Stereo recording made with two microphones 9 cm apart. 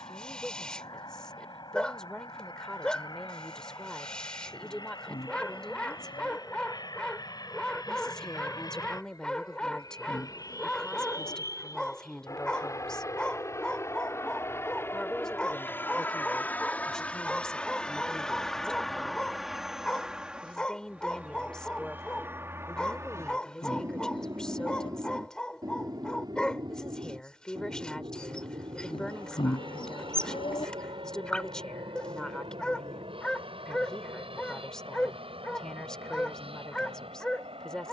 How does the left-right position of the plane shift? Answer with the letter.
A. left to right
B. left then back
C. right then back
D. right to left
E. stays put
A.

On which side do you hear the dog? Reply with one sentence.
In this clip you hear the dog in the centre.